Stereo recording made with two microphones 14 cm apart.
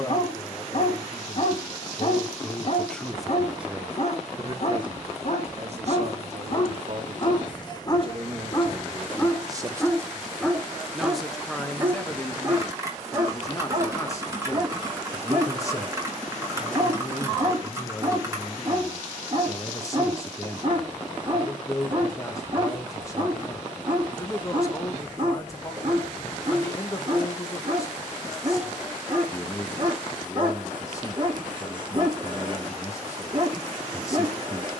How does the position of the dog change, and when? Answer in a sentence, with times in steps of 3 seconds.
In this clip you hear the dog on the left from 0 s, in the centre from 9 s and on the right from 12 s.